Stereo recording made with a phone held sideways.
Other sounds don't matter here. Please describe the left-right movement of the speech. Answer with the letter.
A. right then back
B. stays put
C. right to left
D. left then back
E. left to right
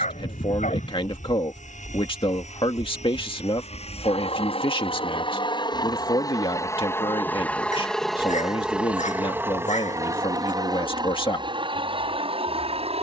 B.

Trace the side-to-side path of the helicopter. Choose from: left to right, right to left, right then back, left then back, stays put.
left to right.